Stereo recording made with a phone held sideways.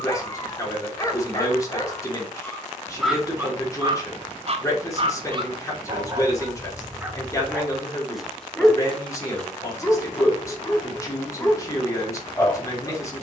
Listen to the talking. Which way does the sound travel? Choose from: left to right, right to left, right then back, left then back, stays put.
stays put.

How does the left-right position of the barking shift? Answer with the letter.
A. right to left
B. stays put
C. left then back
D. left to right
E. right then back
E.